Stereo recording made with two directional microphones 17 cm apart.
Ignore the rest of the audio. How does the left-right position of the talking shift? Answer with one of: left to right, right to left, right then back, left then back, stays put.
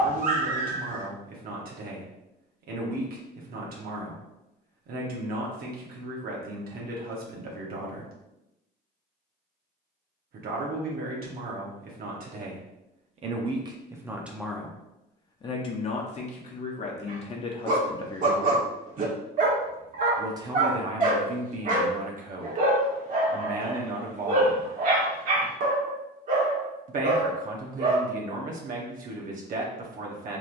left then back.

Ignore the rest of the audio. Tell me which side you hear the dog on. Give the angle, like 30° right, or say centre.
50° right.